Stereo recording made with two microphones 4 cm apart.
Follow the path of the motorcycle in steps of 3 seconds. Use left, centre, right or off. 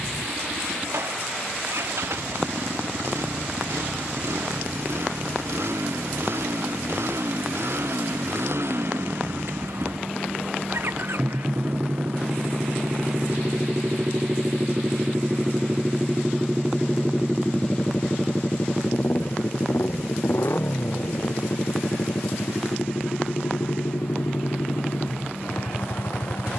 right, right, right, right, right, centre, left, left, left.